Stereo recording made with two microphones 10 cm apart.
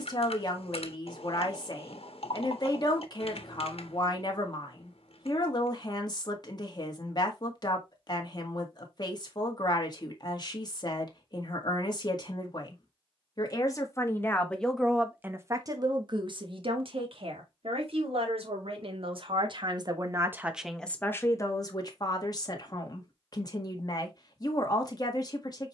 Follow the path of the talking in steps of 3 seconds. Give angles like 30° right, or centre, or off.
40° left, 40° left, 40° left, 40° left, 30° left, 50° right, 50° right, 40° left, 40° left.